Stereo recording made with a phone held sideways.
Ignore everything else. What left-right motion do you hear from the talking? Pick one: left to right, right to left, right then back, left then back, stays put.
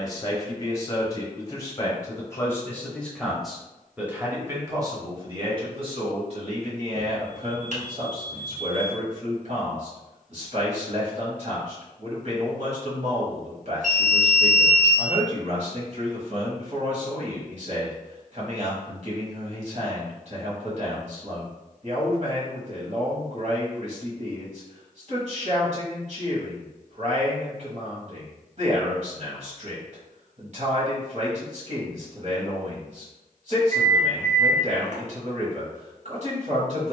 left to right.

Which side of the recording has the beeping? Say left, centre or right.
right.